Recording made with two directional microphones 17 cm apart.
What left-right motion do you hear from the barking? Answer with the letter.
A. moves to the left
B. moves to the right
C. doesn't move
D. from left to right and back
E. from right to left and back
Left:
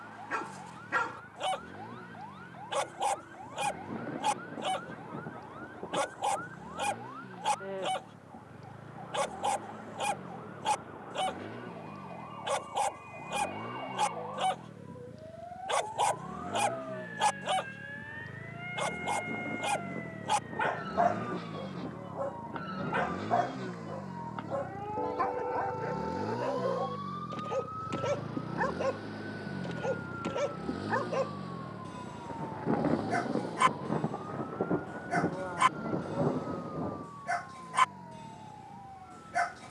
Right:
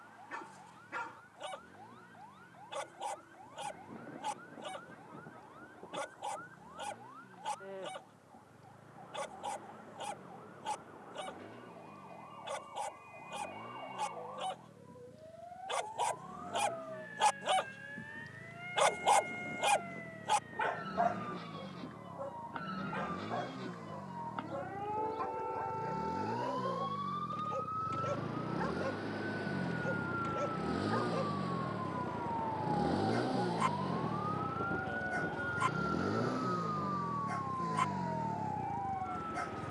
D.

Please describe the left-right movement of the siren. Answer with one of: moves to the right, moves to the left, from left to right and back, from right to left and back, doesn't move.
moves to the right.